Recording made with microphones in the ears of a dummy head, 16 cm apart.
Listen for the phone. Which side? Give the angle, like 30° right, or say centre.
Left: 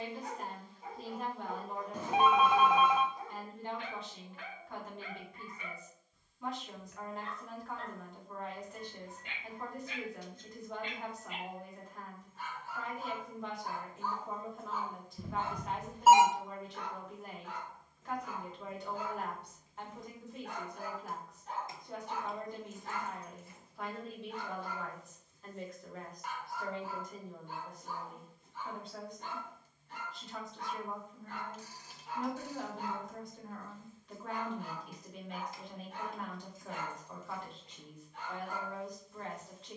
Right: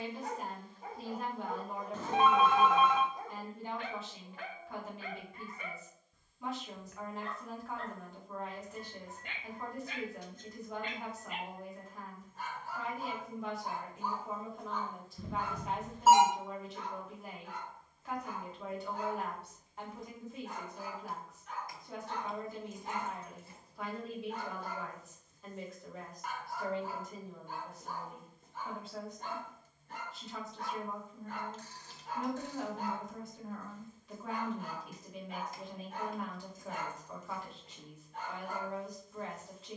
10° left.